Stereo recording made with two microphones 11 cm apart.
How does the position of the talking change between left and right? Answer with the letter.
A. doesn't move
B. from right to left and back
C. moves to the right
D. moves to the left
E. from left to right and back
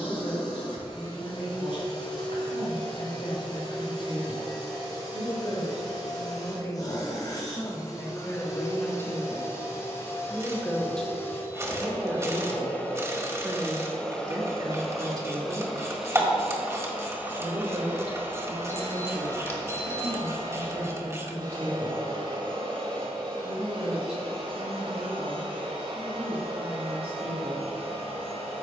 C.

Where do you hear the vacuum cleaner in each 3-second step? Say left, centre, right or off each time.
left, left, left, left, centre, centre, right, right, right, right.